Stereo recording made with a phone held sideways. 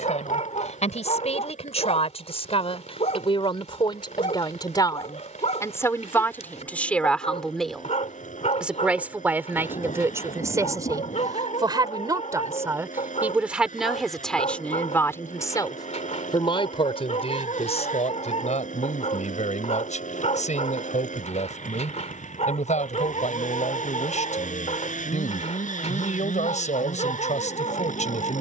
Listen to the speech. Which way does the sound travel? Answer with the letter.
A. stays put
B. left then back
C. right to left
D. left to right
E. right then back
E.